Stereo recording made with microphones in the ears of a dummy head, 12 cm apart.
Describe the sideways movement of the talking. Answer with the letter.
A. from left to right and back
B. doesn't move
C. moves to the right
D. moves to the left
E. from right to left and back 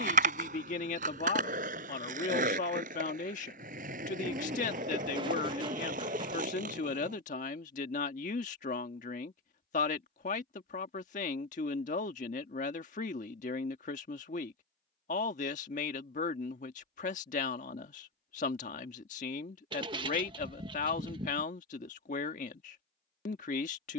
B.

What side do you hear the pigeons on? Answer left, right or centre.
right.